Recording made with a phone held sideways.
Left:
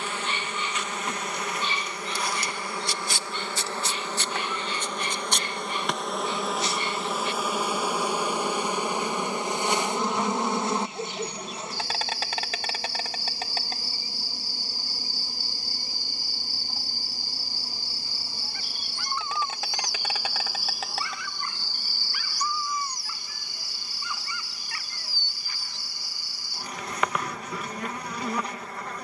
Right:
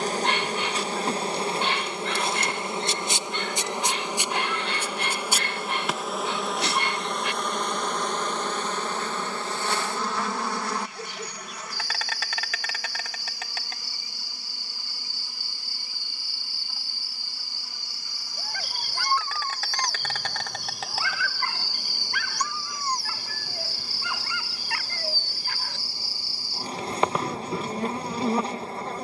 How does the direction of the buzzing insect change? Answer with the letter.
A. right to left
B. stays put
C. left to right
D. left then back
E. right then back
D.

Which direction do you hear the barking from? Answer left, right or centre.
right.